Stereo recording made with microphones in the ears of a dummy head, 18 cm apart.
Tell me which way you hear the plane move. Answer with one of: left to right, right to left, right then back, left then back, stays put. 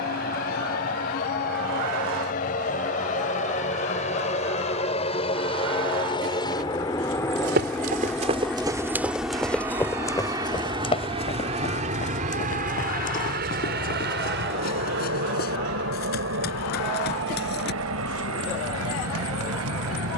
left to right.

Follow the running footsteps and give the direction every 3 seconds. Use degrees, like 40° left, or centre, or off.
off, off, 30° right, 20° left, 40° left, 50° left, off.